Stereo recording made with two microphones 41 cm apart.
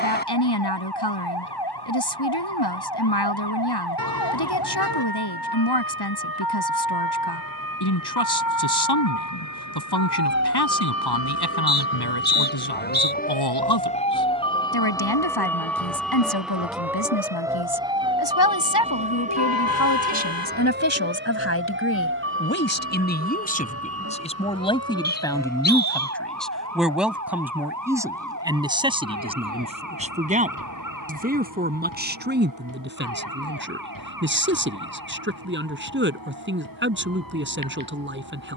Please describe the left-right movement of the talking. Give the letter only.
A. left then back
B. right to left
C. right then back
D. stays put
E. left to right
E.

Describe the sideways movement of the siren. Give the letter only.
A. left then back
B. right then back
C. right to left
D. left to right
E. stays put
D.